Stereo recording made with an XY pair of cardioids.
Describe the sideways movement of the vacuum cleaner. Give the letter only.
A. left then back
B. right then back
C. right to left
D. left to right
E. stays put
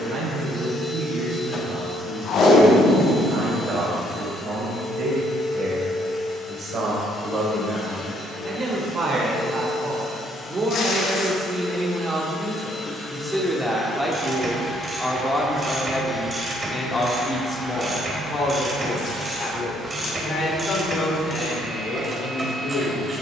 D.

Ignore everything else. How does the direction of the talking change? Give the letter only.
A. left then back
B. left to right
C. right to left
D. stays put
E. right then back
C.